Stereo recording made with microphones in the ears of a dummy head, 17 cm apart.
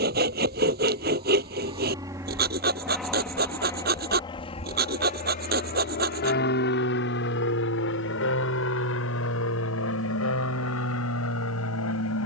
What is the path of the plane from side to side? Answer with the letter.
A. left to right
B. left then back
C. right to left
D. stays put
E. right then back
C.